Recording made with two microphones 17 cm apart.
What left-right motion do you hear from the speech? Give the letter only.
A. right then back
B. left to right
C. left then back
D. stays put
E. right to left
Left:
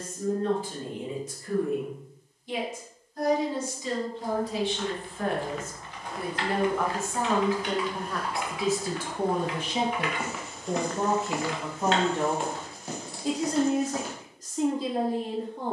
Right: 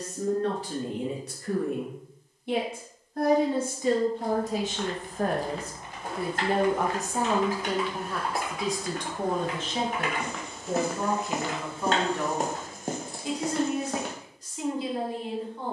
E.